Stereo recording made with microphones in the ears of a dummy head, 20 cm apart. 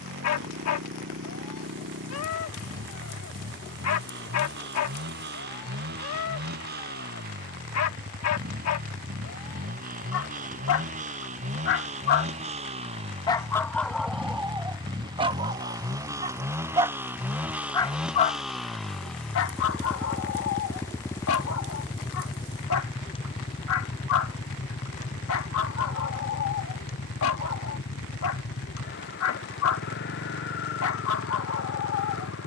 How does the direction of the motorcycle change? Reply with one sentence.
You can hear the motorcycle move from right to left.